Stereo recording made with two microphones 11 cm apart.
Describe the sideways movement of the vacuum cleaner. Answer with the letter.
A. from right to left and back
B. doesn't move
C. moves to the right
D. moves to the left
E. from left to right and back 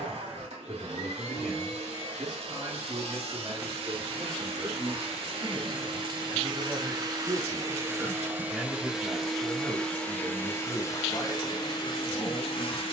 D.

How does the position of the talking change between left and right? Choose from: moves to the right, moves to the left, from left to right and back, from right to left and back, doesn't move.
moves to the left.